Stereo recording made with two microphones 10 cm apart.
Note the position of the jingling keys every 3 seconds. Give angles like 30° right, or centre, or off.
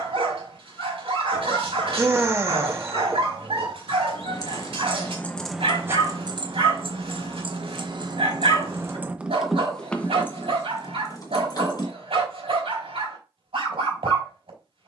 off, 20° left, 50° right, 20° left, off.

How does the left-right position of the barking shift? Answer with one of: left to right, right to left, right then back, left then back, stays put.
stays put.